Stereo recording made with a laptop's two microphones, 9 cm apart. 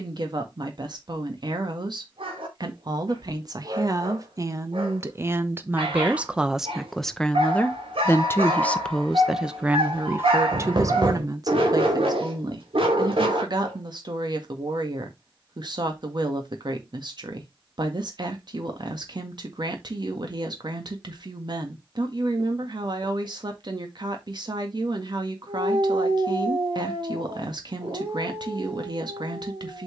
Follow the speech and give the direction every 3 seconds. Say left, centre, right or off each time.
right, right, centre, right, right, right, right, right, right, right.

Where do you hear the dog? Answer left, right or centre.
right.